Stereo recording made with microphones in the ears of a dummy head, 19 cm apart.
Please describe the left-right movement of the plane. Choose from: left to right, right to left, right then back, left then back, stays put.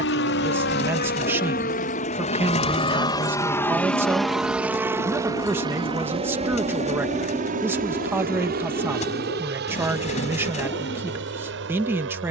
left to right.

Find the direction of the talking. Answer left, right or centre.
centre.